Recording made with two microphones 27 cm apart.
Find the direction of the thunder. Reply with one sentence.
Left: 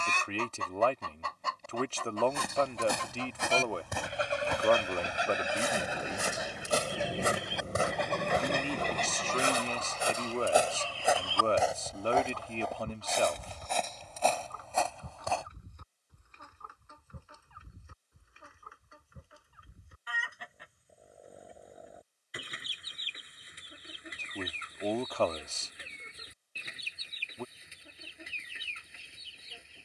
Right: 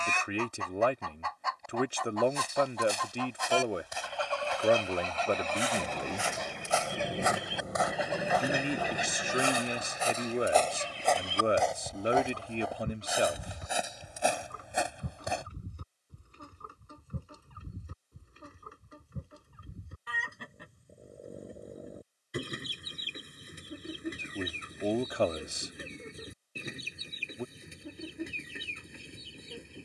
You can hear the thunder in the centre.